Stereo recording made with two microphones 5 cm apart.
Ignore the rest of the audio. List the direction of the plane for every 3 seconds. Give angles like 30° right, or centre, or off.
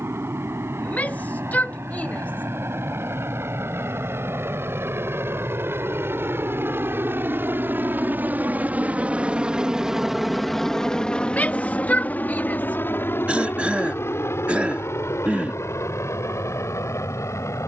80° right, 70° right, 50° right, centre, 50° left, 60° left.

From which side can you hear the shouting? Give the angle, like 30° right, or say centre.
30° left.